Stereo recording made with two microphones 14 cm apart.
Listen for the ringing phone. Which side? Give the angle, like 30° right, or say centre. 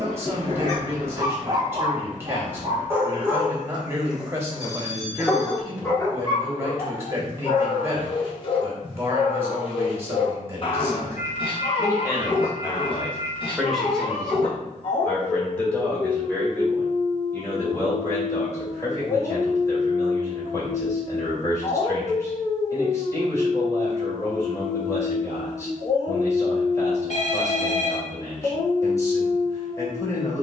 60° left.